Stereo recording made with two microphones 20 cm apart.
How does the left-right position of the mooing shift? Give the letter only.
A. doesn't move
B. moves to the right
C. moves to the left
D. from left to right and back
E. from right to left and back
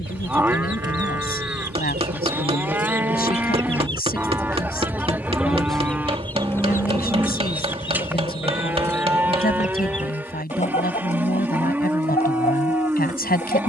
A.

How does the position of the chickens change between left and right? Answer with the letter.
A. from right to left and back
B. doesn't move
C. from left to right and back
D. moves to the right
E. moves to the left
E.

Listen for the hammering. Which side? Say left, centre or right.
right.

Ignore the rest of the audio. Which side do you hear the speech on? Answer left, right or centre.
left.